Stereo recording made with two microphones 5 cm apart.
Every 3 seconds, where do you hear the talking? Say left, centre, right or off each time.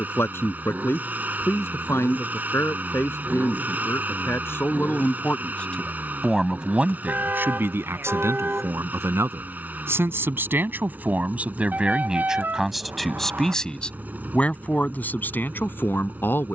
left, left, right, right, centre, left.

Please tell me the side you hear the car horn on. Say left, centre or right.
right.